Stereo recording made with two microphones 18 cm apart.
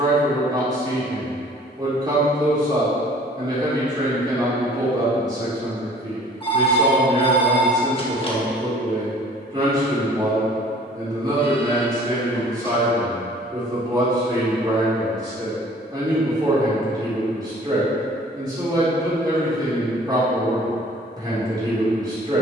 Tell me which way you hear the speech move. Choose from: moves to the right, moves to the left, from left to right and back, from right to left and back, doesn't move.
doesn't move.